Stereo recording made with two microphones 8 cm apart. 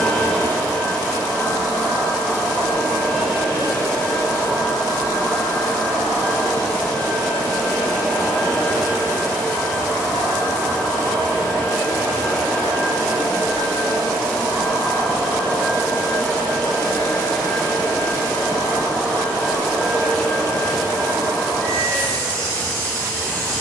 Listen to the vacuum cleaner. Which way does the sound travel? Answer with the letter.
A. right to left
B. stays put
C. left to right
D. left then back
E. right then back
B.